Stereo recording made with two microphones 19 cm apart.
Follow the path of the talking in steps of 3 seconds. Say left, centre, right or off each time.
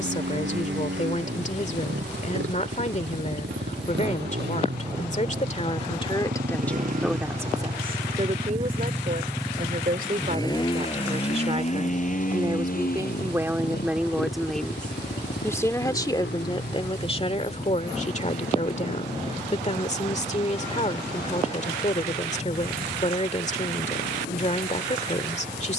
left, left, centre, right, centre, left, left, left, left.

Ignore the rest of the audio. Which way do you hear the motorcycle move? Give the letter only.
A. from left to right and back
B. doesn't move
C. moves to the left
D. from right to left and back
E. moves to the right
C.